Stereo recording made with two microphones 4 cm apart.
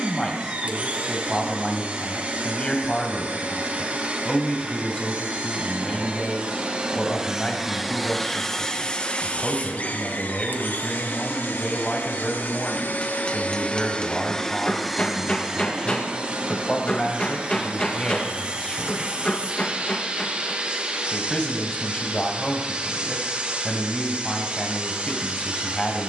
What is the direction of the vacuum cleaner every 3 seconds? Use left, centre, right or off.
right, right, centre, left, left, right, right, right, right.